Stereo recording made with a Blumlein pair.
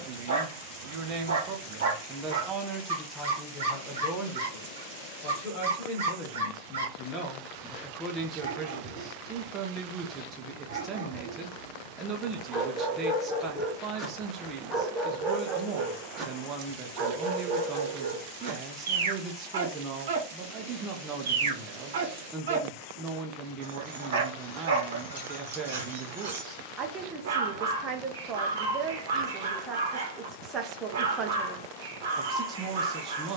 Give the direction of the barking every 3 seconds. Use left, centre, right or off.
right, right, right, right, centre, right, right, right, right, right, right.